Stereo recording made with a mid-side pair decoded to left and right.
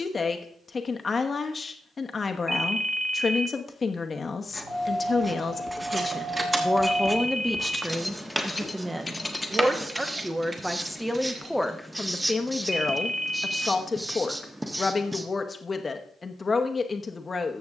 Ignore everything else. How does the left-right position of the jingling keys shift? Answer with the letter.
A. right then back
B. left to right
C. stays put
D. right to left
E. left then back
E.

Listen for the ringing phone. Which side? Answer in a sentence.
You can hear the ringing phone in the centre.